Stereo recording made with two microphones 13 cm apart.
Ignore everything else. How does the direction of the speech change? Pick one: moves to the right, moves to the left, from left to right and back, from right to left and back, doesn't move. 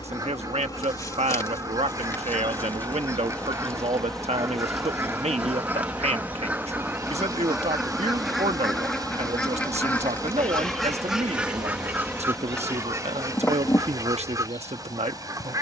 doesn't move.